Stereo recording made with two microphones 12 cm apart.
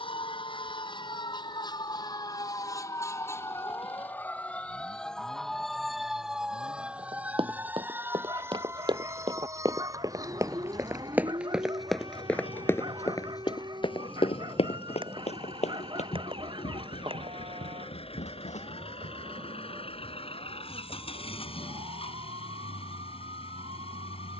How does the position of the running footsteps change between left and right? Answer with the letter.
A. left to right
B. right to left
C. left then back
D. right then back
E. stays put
B.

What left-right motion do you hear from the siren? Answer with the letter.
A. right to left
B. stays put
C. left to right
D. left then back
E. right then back
C.